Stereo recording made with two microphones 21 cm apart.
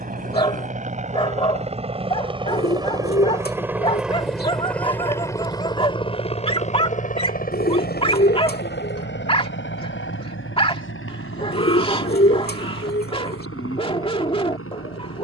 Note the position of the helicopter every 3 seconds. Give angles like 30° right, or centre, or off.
30° right, centre, 40° left, 60° left, 70° left.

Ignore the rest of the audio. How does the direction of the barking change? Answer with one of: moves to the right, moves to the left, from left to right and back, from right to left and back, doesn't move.
doesn't move.